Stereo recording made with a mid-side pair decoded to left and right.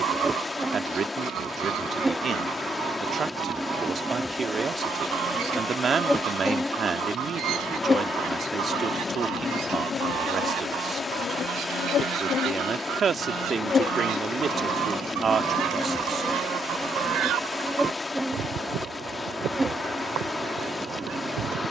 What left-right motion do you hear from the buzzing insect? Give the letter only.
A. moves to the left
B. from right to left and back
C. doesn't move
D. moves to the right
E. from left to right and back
B.